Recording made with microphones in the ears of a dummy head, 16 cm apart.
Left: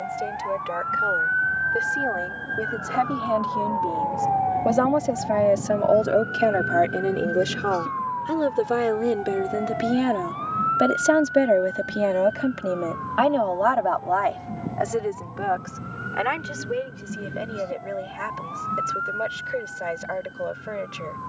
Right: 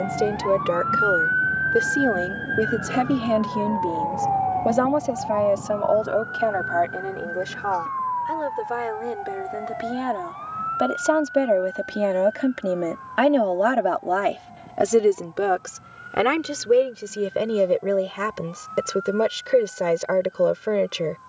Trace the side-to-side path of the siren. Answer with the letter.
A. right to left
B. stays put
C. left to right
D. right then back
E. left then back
A.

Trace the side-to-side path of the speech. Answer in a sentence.
You can hear the speech go left and come back.